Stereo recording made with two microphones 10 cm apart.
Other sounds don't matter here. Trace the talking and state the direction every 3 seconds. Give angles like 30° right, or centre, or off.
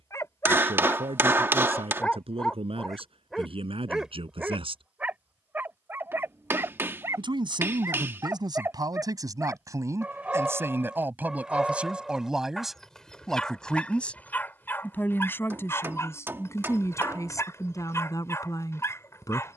80° right, 70° right, 50° right, 30° right, centre, 30° left, 40° left.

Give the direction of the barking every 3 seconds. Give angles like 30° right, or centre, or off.
10° left, 10° right, 20° right, 10° right, 10° left, 30° left, 30° left.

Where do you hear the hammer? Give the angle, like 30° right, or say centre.
20° right.